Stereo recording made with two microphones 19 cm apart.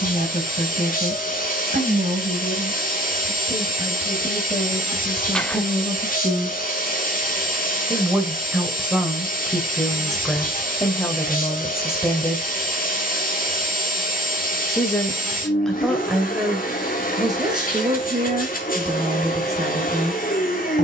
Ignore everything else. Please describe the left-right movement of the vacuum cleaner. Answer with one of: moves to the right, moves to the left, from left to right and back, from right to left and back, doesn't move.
doesn't move.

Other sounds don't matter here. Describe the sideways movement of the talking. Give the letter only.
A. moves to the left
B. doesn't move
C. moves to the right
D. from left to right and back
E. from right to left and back
E.